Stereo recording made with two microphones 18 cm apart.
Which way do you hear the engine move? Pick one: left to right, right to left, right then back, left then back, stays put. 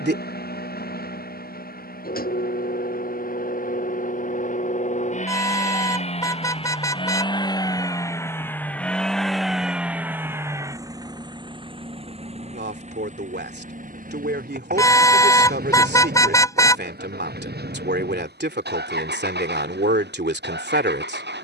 left to right.